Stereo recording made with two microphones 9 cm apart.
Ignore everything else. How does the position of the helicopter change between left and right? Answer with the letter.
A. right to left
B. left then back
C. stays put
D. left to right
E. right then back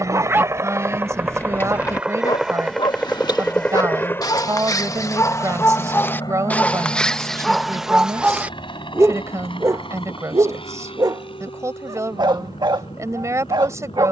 A.